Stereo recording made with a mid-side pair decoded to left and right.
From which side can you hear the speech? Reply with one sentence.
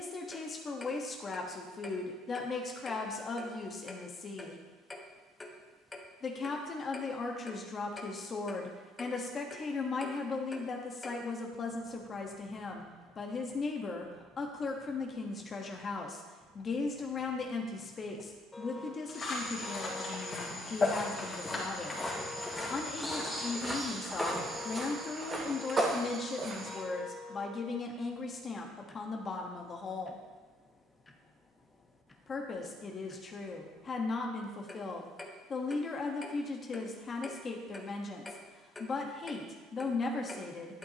In this clip you hear the speech on the left.